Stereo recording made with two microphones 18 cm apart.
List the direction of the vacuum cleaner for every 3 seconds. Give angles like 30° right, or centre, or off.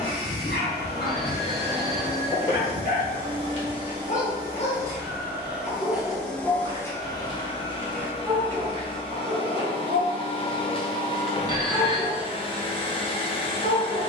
30° right, 20° right, 20° left, 30° left, 30° left.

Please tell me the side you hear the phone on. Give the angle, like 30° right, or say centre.
30° left.